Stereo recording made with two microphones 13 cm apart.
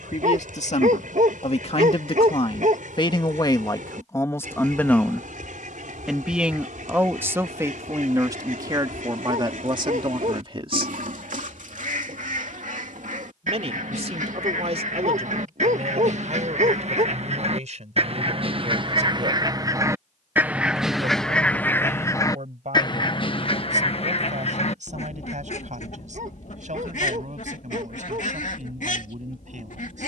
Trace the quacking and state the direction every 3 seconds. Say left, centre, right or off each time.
right, right, right, right, right, right, right, left, left, left.